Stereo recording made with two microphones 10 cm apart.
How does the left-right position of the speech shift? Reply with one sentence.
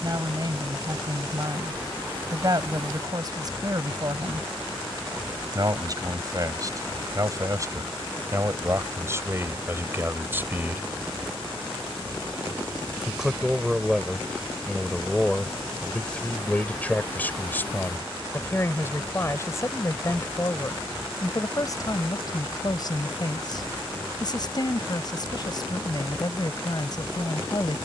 In this clip you hear the speech move from right to left.